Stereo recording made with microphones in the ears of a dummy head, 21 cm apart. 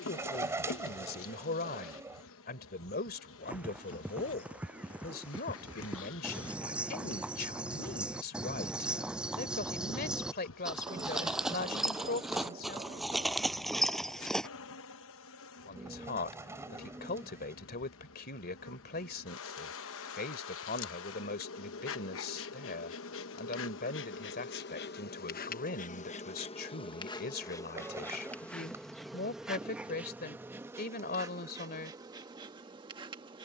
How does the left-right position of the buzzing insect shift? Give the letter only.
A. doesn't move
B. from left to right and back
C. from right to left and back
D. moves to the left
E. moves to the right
E.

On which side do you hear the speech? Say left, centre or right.
left.